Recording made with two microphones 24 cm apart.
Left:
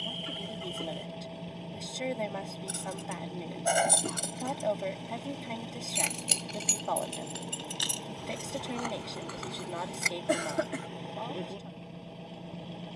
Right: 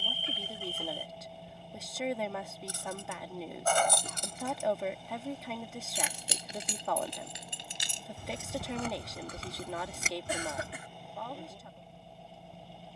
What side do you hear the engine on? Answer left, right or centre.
left.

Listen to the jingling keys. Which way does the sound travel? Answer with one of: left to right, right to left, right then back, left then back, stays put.
left to right.